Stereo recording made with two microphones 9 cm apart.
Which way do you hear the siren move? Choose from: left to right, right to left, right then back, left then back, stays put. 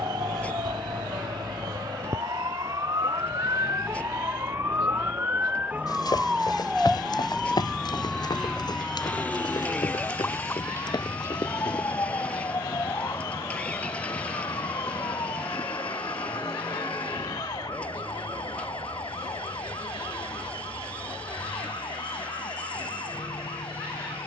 right to left.